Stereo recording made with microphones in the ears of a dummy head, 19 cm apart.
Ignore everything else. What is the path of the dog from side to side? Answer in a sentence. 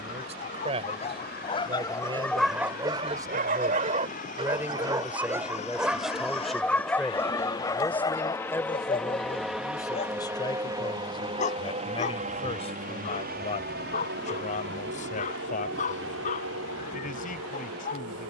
You can hear the dog go right and come back.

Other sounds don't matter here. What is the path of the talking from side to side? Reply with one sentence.
In this clip you hear the talking travel towards the left.